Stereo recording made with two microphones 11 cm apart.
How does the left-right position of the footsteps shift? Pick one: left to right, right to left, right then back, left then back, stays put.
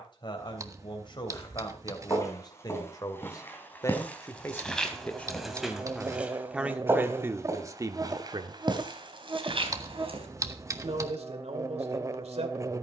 left to right.